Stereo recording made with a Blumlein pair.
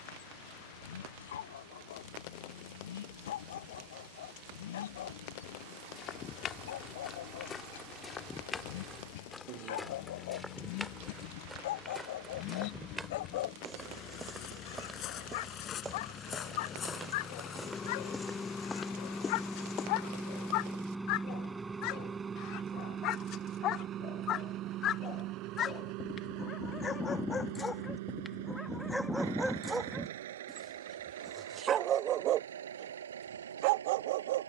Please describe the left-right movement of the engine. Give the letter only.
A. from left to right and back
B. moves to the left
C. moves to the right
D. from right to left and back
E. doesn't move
C.